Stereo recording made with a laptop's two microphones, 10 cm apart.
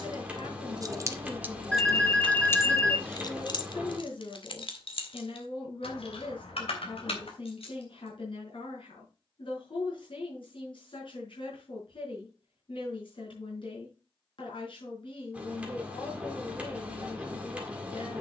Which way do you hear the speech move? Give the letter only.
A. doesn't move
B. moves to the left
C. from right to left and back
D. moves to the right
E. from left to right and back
A.